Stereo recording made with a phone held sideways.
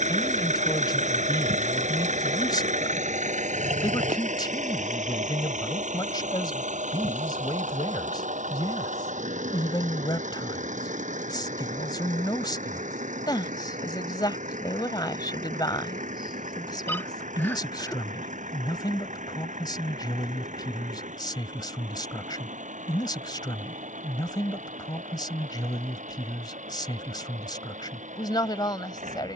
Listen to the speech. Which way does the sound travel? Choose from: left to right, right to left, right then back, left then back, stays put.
stays put.